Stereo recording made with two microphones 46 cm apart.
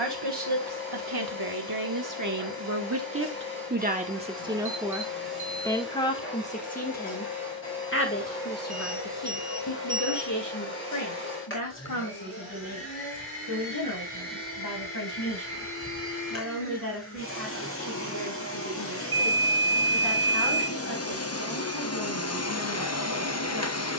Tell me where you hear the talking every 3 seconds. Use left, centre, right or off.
right, centre, left, left, left, left, left, left.